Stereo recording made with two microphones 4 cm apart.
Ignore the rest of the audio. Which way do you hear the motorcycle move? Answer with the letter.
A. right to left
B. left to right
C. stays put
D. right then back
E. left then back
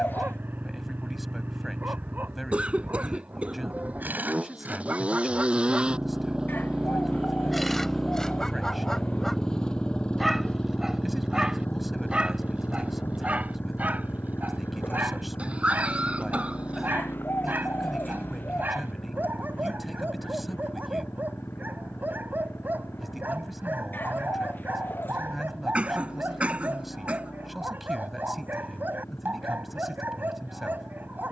A.